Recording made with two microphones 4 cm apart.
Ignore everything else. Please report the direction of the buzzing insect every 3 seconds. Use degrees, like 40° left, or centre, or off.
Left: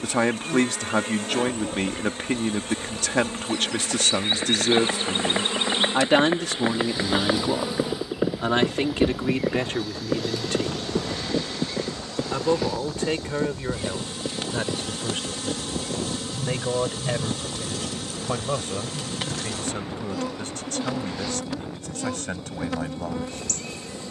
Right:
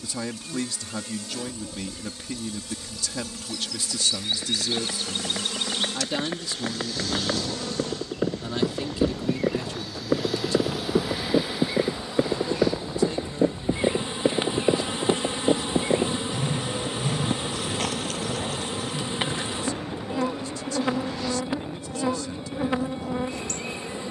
50° left, 40° left, 20° left, 10° right, 20° right, 20° right, 20° right, 20° right.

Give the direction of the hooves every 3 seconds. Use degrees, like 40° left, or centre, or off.
50° left, 40° left, 20° left, 10° right, 40° right, 50° right, 60° right, off.